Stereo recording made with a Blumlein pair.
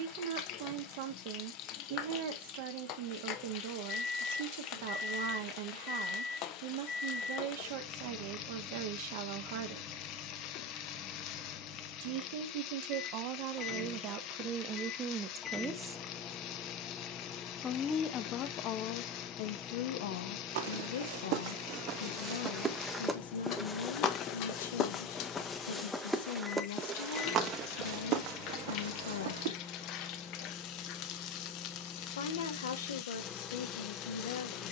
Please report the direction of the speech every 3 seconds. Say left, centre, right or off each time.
right, right, right, right, right, centre, left, left, left, left, left, left.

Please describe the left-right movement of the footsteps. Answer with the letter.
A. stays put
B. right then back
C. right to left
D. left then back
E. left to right
D.